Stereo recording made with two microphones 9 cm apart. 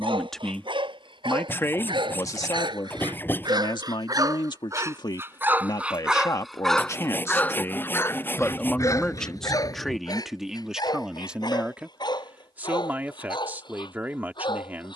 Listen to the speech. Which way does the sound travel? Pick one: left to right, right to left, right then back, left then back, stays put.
left then back.